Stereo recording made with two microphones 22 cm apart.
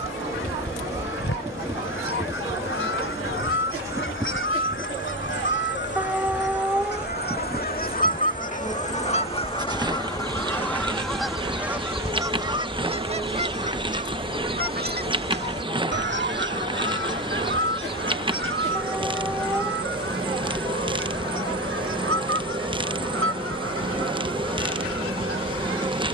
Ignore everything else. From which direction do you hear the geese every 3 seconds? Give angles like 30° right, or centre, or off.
70° left, 60° left, 40° left, 10° left, 30° right, 60° right, 70° right, 70° right, 80° right.